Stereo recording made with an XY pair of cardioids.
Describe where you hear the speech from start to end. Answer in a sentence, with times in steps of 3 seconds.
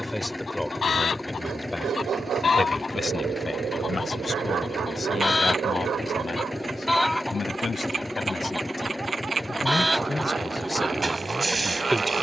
You can hear the speech in the centre from 0 s, on the left from 3 s and in the centre from 9 s.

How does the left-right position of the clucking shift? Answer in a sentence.
In this clip you hear the clucking travel towards the right.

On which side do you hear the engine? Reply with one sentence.
You can hear the engine in the centre.